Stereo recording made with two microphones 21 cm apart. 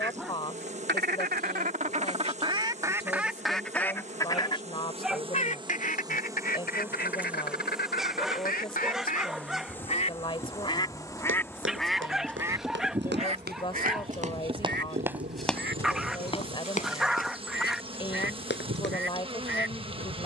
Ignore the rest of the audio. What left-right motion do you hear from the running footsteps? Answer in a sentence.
In this clip you hear the running footsteps move from right to left.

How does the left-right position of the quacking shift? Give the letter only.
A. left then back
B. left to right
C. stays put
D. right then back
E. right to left
A.